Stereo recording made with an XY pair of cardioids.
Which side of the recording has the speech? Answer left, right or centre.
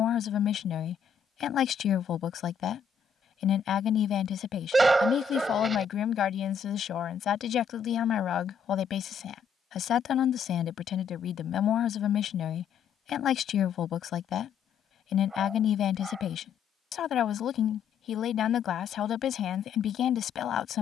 left.